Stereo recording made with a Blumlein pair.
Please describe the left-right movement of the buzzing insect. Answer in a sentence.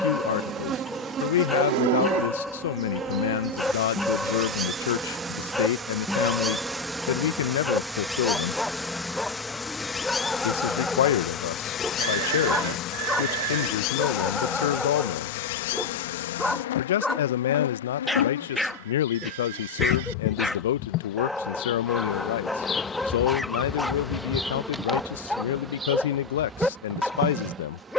In this clip you hear the buzzing insect go left and come back.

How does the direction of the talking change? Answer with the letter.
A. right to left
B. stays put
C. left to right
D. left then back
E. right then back
B.